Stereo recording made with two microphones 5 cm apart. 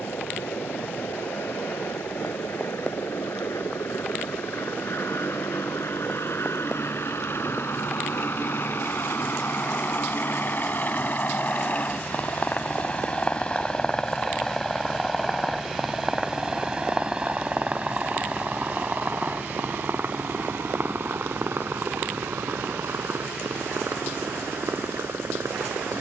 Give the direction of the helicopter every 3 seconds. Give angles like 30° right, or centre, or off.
70° left, 70° left, 60° left, 40° left, 20° left, 10° right, 40° right, 50° right, 60° right.